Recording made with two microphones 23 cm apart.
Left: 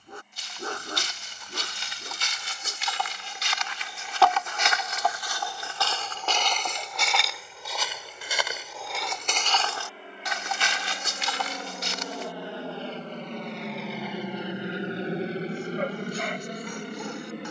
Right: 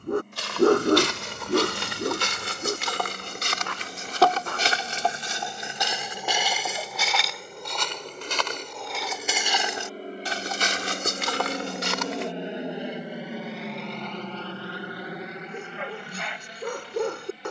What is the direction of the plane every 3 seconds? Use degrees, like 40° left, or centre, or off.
60° right, 60° right, 60° right, 40° right, centre, 40° left.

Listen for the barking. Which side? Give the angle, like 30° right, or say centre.
60° right.